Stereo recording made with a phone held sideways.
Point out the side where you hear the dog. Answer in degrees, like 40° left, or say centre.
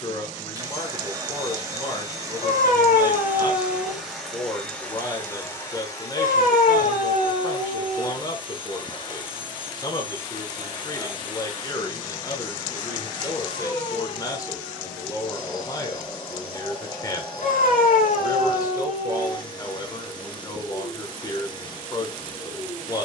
70° left.